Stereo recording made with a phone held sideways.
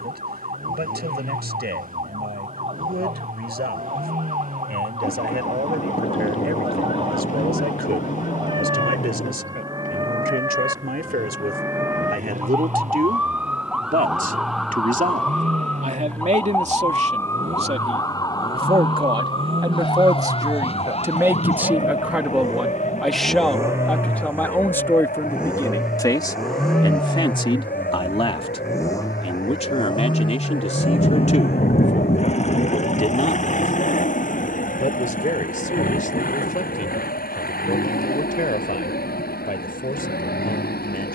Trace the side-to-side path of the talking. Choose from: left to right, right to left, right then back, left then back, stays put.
right to left.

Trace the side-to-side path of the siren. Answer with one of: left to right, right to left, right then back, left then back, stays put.
right to left.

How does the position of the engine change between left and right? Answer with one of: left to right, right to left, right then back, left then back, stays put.
right to left.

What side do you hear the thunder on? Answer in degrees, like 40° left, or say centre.
50° left.